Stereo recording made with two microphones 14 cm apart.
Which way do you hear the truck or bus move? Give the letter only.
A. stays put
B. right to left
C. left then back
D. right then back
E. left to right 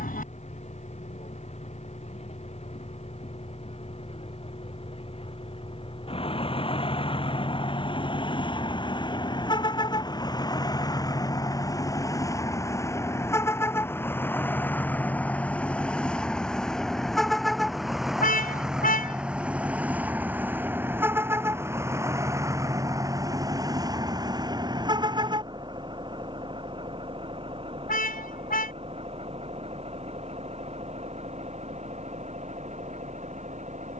E.